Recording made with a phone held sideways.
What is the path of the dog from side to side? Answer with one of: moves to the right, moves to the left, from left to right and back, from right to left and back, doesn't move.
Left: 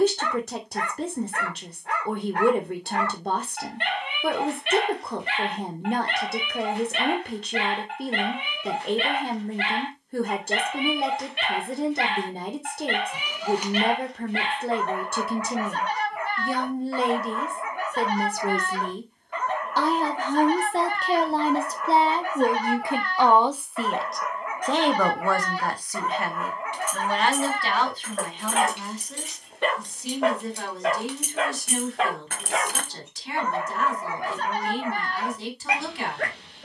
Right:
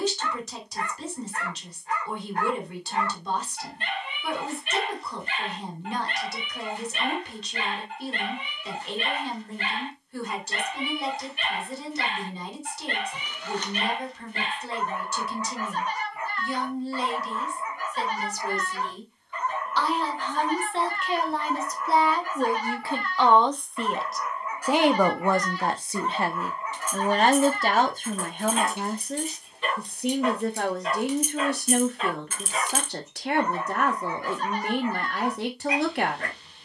doesn't move.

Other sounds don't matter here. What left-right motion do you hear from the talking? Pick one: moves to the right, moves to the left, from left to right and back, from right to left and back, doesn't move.
moves to the right.